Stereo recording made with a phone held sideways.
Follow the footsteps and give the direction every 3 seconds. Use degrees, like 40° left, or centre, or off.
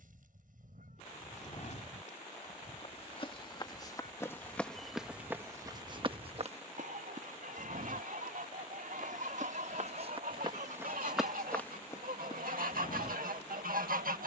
50° left, 10° left, 60° right, 30° right, 40° left.